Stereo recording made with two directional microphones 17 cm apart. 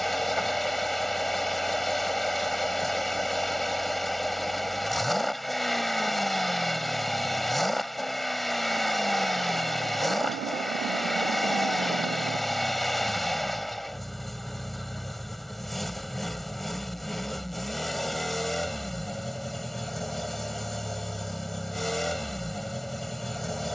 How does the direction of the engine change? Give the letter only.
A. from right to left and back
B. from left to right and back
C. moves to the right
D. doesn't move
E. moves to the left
D.